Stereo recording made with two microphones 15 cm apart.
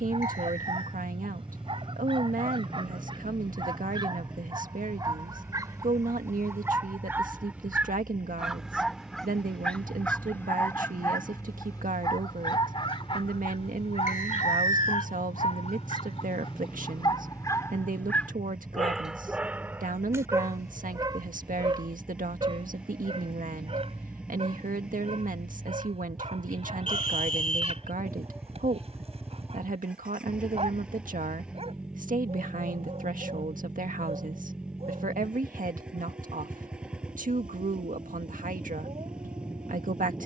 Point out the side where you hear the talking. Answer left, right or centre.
right.